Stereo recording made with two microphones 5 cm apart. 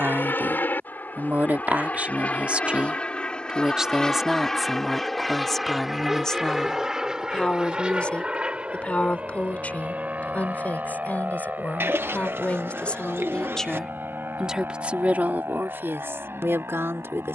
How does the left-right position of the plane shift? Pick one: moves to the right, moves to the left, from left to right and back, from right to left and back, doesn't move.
moves to the right.